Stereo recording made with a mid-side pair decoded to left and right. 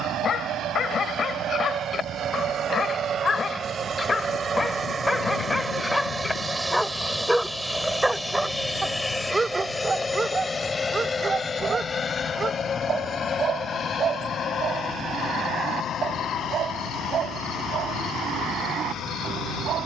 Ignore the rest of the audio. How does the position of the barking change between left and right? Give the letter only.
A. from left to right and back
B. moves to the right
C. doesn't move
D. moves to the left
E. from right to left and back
B.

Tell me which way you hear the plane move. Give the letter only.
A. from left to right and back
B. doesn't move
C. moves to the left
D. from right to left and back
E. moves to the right
C.